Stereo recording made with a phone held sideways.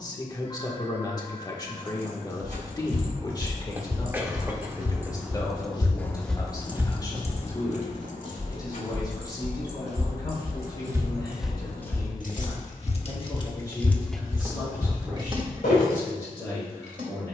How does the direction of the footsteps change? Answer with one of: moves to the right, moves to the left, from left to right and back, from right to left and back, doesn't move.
from left to right and back.